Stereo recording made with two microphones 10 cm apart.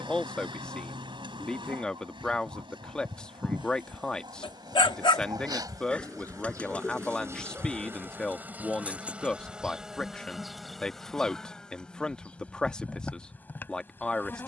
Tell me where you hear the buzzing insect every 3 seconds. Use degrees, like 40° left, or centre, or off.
60° right, 50° right, 30° right, centre, 20° left.